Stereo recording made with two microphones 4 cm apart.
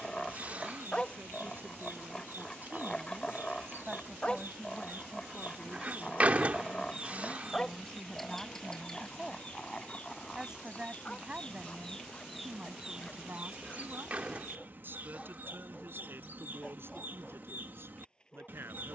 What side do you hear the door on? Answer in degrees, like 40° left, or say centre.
40° right.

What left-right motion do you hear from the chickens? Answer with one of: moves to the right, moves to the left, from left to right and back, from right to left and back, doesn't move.
from right to left and back.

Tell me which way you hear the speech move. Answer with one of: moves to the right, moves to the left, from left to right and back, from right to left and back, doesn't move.
from right to left and back.